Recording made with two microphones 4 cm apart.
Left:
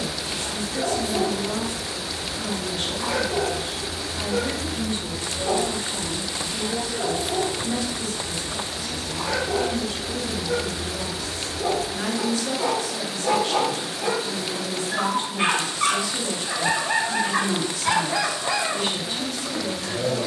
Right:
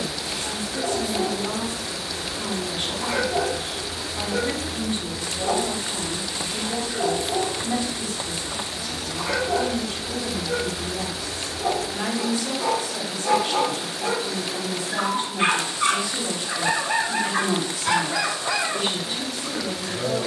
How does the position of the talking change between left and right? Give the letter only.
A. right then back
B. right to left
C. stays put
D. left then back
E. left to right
C.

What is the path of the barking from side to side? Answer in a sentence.
You can hear the barking go right and come back.